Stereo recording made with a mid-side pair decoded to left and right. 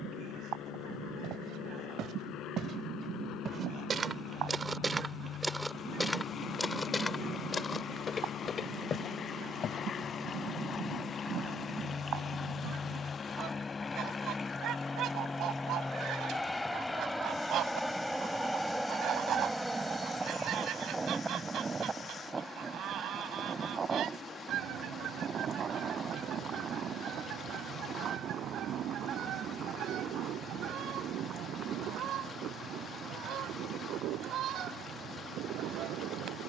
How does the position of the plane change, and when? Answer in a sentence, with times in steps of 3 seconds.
You can hear the plane on the left from 0 s, in the centre from 15 s and on the right from 21 s.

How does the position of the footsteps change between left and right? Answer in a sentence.
You can hear the footsteps go from the right side to the left.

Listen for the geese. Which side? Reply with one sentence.
You can hear the geese on the right.